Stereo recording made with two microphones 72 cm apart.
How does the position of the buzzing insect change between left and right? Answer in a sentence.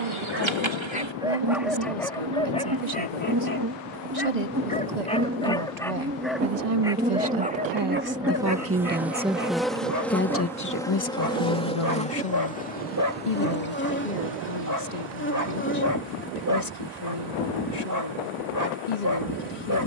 In this clip you hear the buzzing insect travel towards the left.